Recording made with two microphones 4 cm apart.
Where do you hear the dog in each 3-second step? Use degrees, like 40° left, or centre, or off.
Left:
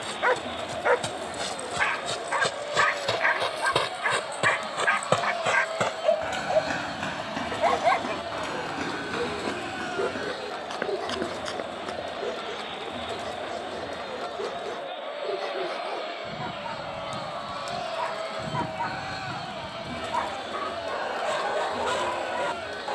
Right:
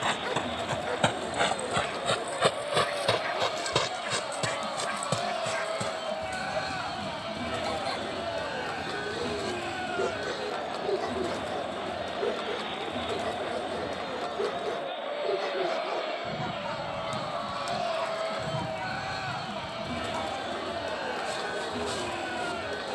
50° left, 50° left, 50° left, 10° left, 10° right, 10° left, 40° left, 40° left.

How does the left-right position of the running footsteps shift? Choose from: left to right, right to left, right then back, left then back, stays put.
right to left.